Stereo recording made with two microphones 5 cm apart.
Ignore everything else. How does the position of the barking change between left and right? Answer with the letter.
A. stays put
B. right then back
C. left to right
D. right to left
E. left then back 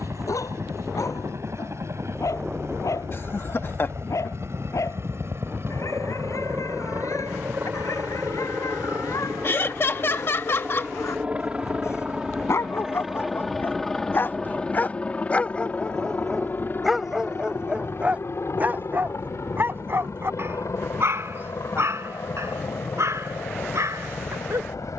C.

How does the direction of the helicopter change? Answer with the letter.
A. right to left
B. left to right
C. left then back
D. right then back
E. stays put
A.